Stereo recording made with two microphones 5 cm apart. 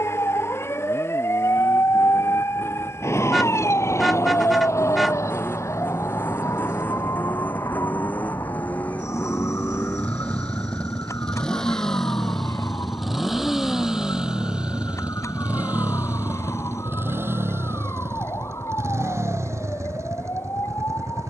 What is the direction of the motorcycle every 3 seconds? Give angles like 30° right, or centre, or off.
50° left, 40° left, 40° left, 20° left, 10° right, 40° right, 70° right.